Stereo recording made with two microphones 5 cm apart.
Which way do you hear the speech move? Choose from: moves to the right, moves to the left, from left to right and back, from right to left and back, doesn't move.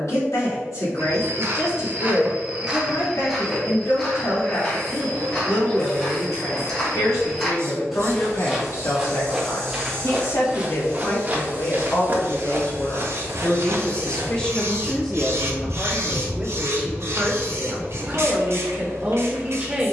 moves to the right.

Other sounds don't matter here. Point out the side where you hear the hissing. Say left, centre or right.
right.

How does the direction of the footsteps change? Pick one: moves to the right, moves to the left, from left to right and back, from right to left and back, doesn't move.
from right to left and back.